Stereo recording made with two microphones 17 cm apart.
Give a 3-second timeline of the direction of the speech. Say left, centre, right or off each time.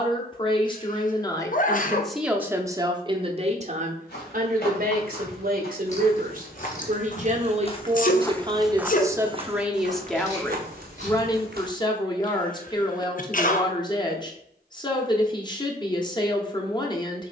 centre, right, right, centre, left, left.